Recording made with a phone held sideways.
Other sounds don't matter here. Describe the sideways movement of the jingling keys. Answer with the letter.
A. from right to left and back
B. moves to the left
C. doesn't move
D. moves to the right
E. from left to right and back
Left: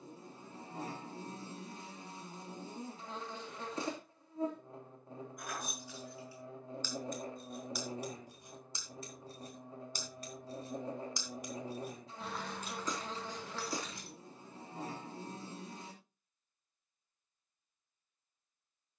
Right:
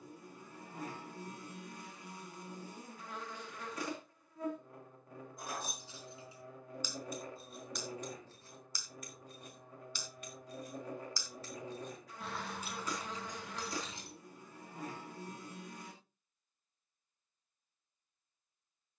A.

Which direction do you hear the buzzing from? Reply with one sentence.
You can hear the buzzing on the left.